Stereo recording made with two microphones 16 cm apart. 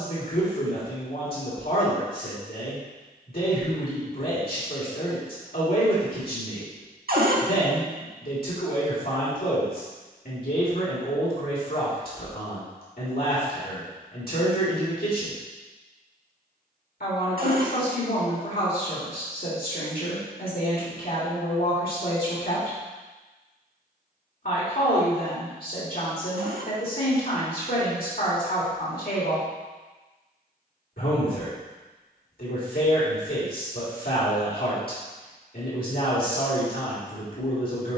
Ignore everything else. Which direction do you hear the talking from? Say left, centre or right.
left.